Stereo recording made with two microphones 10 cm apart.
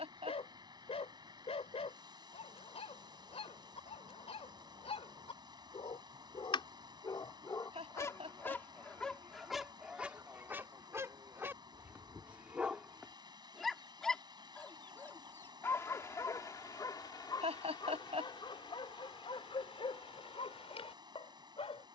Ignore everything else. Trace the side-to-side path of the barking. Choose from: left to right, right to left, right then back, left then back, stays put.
right then back.